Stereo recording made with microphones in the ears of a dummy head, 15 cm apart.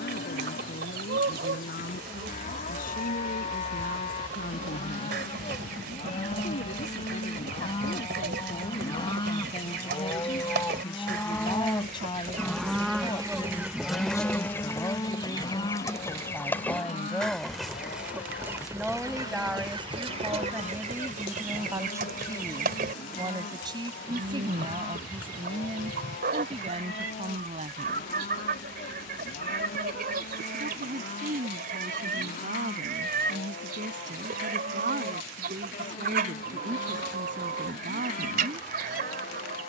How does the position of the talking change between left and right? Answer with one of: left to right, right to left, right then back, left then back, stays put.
left to right.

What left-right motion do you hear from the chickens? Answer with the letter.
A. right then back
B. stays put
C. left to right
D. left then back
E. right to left
D.